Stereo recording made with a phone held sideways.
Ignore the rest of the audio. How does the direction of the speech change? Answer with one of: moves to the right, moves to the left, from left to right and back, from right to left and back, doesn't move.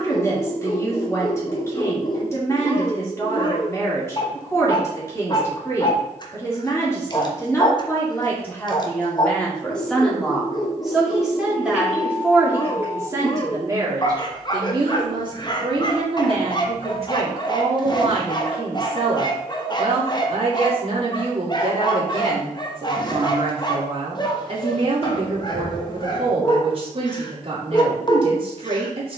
moves to the right.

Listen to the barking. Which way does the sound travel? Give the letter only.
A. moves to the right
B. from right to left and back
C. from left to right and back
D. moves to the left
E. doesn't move
E.